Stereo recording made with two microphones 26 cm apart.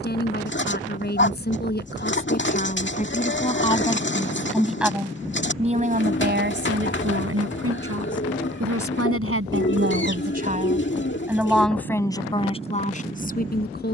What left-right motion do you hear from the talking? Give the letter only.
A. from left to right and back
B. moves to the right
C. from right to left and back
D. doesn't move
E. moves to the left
A.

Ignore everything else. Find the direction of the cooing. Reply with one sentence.
You can hear the cooing on the left.